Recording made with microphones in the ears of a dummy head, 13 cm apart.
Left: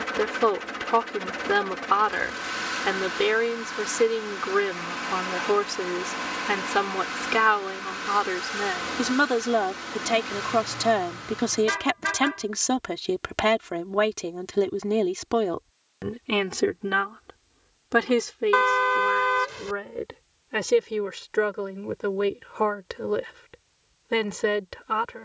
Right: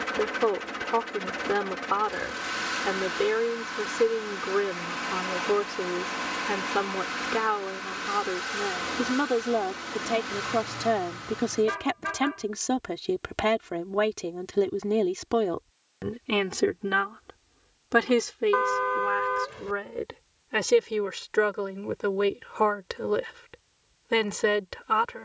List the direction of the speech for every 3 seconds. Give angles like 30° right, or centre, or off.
70° left, 70° left, 60° left, 50° left, 30° left, 10° left, 10° right, 20° right, 20° right.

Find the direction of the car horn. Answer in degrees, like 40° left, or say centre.
60° left.